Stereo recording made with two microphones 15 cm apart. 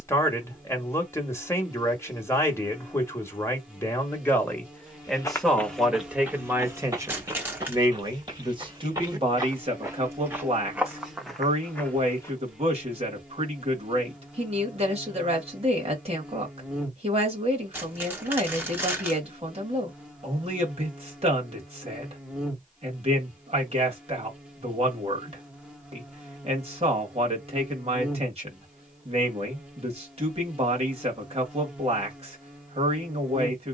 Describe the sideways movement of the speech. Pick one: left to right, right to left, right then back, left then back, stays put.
left to right.